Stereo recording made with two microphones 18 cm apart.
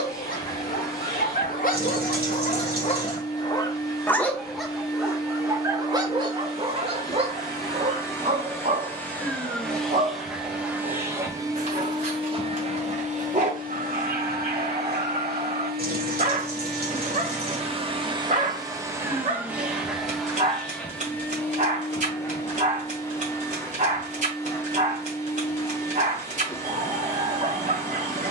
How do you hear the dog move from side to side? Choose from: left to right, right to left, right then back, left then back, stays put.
left to right.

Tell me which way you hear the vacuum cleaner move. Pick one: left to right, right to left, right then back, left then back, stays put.
right then back.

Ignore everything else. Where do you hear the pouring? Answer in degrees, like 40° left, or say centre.
60° right.